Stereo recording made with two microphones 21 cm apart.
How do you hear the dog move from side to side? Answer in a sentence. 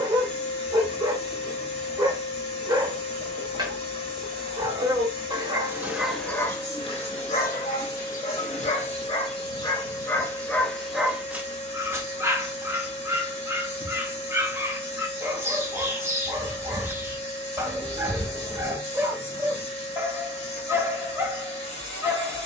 In this clip you hear the dog go left and come back.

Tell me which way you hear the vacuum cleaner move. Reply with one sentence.
You can hear the vacuum cleaner stay in one place.